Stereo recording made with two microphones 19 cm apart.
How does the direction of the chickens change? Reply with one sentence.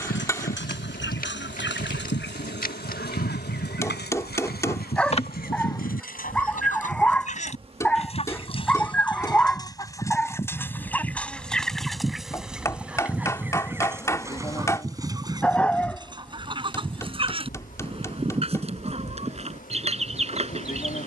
You can hear the chickens move to the right.